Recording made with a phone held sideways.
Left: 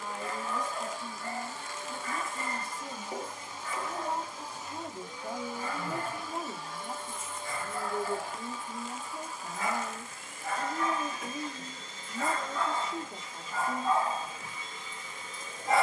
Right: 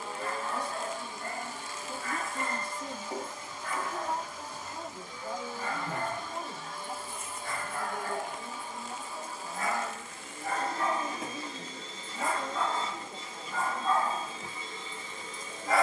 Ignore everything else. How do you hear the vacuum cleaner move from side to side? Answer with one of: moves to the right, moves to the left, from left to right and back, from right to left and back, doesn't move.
from right to left and back.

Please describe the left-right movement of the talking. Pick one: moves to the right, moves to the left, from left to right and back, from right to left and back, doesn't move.
moves to the left.